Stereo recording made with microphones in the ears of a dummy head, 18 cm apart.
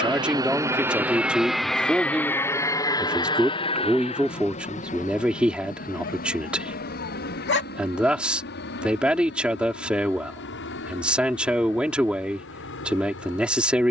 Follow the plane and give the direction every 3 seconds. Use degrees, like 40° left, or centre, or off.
centre, 30° left, 50° left, 50° left, 60° left.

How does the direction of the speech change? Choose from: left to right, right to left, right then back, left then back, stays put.
stays put.